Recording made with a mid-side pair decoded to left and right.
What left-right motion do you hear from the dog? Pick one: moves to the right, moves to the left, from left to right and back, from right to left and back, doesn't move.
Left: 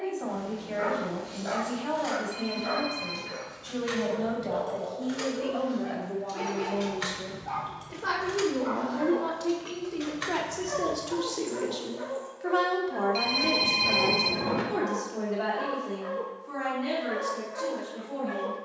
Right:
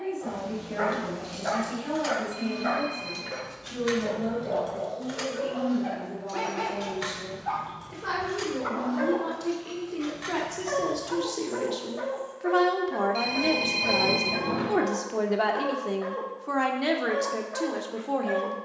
doesn't move.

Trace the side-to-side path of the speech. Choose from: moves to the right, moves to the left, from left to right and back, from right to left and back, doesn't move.
moves to the right.